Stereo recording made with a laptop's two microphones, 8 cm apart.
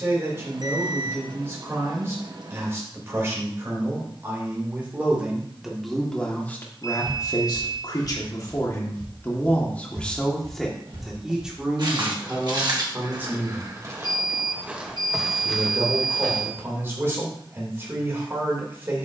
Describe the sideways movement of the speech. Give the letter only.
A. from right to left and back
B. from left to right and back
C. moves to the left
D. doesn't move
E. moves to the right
A.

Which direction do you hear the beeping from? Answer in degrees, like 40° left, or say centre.
50° right.